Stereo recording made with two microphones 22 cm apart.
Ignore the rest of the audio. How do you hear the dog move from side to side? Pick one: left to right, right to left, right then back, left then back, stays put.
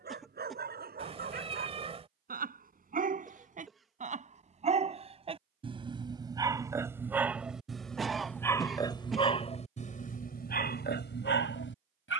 right to left.